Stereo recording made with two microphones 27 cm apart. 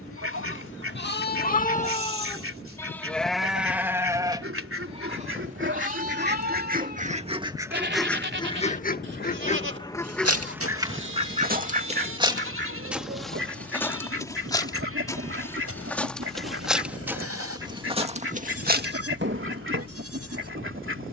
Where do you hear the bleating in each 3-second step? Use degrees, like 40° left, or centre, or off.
30° left, 10° right, 40° right, 50° right, 60° right, 60° right, 60° right.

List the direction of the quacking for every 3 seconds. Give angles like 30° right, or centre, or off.
50° right, 50° right, 10° right, centre, 50° right, 50° right, 50° right.